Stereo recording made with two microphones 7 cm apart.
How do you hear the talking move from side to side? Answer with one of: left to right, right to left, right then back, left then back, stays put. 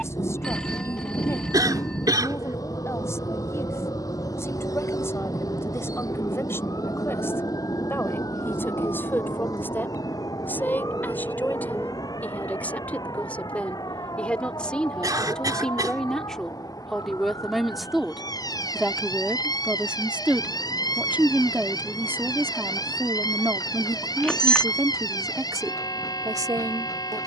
left to right.